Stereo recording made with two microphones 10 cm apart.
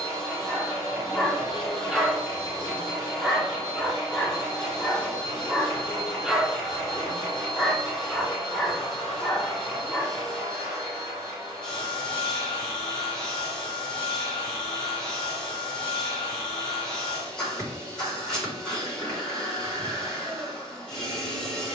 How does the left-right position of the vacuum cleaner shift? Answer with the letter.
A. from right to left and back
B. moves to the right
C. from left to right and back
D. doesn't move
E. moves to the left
D.